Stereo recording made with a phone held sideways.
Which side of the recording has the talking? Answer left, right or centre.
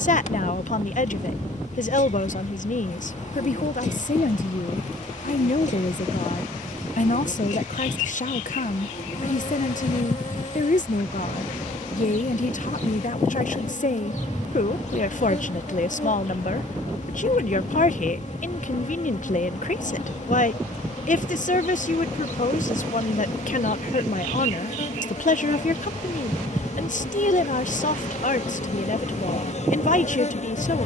left.